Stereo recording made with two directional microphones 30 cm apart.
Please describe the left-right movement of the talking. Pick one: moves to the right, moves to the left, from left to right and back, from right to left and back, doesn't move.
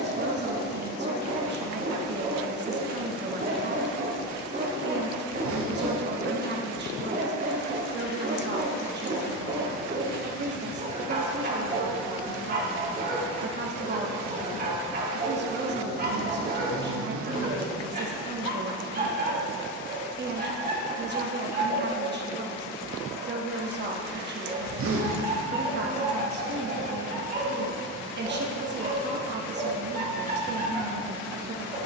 doesn't move.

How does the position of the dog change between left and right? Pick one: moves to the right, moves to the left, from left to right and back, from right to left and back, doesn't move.
doesn't move.